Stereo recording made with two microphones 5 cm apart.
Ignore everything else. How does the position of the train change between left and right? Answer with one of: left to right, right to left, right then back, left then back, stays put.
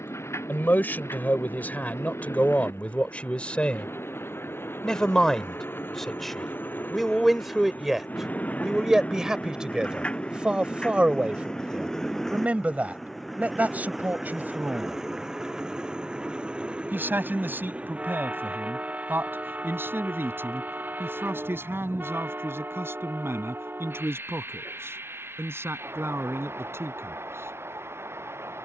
left to right.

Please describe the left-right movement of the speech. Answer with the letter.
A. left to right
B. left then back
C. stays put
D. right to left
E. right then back
A.